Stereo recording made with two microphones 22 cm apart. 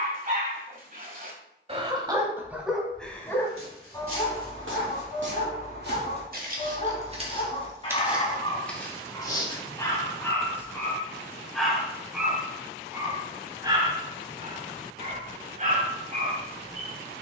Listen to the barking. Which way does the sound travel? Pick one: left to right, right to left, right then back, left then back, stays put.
left then back.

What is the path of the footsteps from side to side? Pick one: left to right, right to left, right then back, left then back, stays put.
right to left.